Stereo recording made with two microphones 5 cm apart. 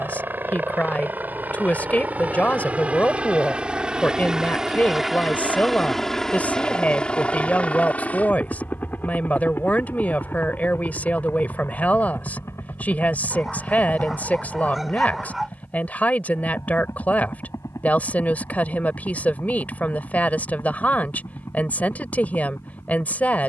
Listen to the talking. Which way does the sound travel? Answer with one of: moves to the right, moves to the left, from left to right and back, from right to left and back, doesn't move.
doesn't move.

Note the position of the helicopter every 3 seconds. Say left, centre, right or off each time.
right, centre, left, left, left, left, left, left.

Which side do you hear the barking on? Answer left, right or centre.
centre.